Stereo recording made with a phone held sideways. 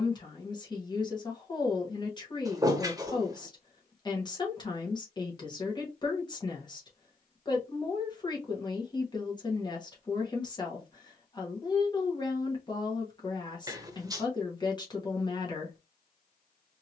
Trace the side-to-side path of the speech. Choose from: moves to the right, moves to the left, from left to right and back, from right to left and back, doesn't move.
doesn't move.